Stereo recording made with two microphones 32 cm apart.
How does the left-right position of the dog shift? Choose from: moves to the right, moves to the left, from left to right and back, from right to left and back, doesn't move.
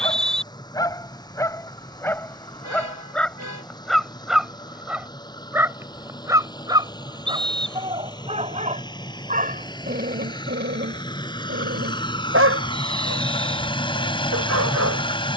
moves to the right.